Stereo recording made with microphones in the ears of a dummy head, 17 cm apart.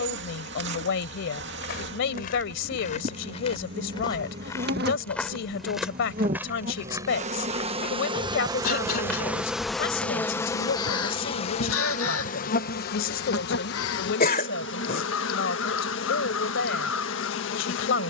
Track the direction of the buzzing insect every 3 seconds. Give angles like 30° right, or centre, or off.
60° right, 50° right, 30° right, 10° left, 50° left, 60° left.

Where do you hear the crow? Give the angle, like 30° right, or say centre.
80° left.